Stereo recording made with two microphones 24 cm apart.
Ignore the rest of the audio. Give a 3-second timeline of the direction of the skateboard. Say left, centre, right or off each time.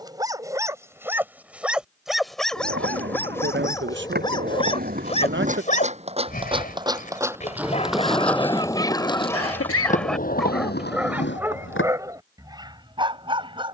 right, right, centre, left, off.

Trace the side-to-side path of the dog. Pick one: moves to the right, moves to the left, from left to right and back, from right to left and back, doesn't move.
from right to left and back.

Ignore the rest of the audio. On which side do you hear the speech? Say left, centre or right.
right.